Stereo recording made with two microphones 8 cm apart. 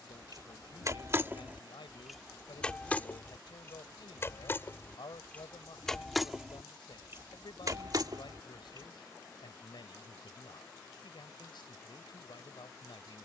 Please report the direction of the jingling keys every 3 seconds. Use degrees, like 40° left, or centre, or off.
20° right, 30° left, 40° right, off, off.